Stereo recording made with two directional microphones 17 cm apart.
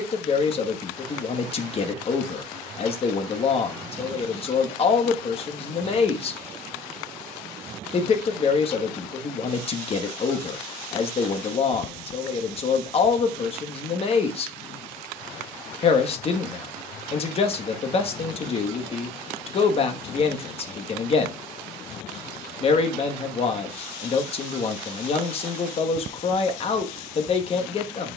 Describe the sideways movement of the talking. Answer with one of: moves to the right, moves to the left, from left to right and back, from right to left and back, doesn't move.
doesn't move.